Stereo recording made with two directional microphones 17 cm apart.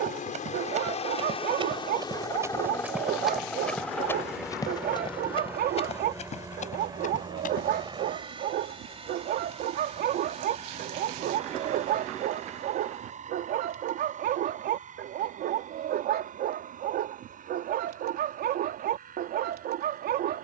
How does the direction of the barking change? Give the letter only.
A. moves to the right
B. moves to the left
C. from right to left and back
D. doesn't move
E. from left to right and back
D.